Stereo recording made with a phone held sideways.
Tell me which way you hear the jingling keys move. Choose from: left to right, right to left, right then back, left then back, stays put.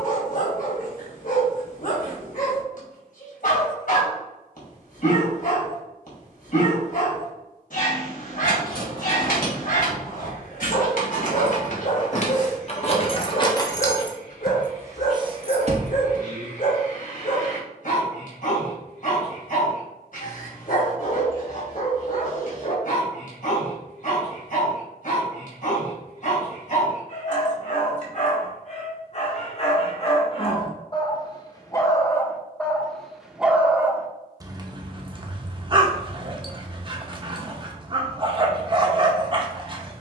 left to right.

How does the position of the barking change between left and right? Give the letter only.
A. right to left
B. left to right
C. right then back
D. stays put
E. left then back
B.